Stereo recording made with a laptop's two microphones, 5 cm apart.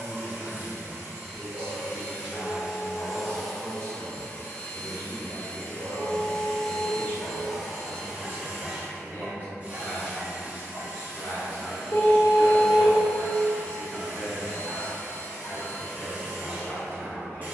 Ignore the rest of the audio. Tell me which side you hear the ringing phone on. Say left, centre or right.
left.